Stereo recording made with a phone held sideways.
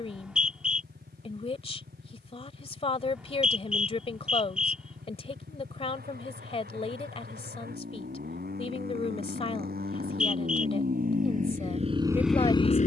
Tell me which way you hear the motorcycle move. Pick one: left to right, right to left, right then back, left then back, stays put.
right to left.